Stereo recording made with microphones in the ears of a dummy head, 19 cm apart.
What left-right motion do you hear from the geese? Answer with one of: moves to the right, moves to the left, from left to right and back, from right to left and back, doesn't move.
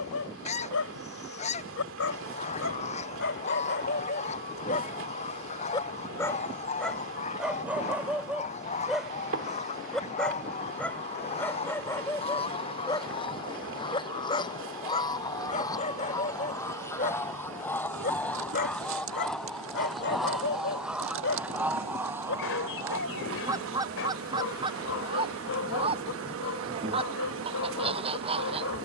moves to the right.